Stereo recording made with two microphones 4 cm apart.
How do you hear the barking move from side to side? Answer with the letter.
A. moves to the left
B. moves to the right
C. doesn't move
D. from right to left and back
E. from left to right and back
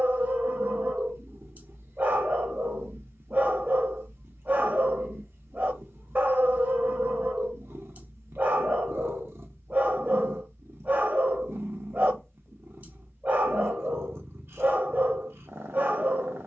C.